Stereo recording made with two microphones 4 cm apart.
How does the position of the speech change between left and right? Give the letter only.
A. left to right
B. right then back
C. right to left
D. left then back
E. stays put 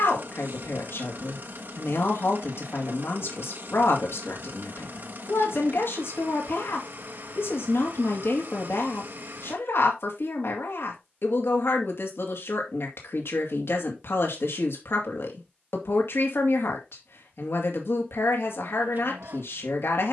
E.